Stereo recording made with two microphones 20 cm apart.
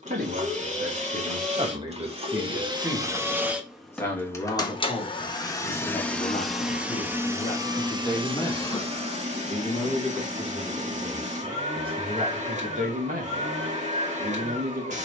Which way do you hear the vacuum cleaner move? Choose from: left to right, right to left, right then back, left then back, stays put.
left then back.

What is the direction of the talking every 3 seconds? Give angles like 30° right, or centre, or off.
30° right, 20° left, 30° left, 10° right, 40° right.